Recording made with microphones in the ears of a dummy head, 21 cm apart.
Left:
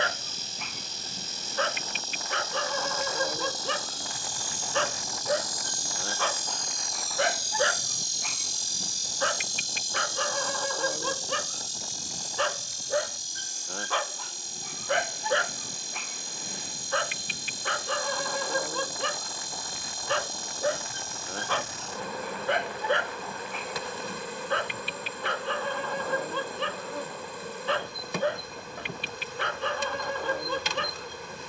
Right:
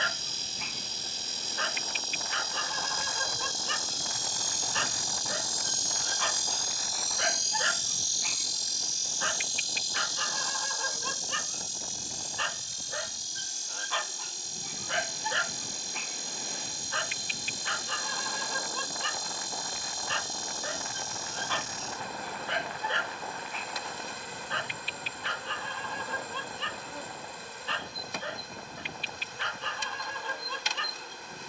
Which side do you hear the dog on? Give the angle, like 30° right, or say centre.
40° left.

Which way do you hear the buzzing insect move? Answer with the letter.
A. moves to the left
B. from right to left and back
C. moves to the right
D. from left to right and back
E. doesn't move
A.